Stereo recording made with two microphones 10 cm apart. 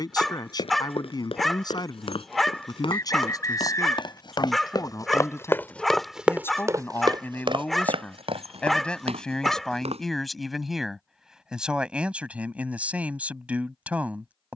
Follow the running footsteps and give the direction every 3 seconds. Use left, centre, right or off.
left, left, right, right, off.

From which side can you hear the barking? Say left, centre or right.
centre.